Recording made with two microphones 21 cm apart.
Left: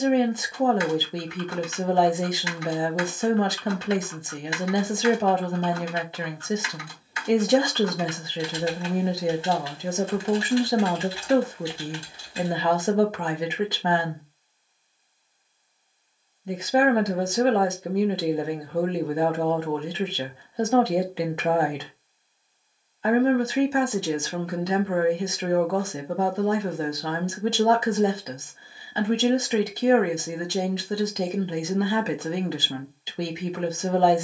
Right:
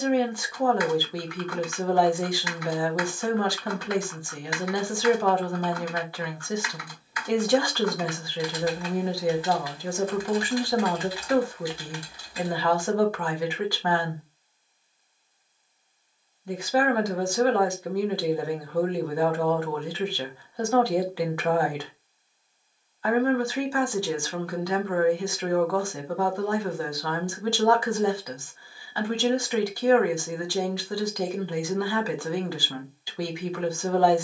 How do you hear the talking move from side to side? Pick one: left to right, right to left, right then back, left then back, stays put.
stays put.